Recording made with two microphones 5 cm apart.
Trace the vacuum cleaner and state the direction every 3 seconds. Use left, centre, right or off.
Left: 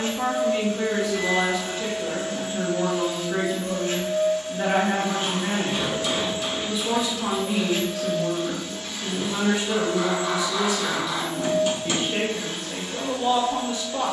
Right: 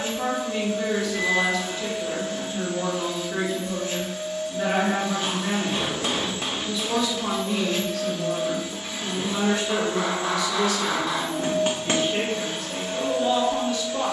left, left, centre, right, right.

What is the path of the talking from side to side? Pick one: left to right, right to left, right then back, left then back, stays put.
stays put.